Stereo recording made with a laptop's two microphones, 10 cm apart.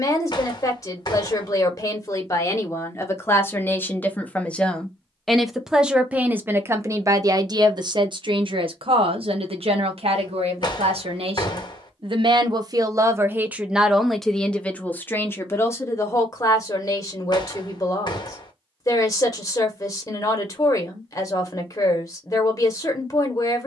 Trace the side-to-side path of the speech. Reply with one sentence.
In this clip you hear the speech move from left to right and back again.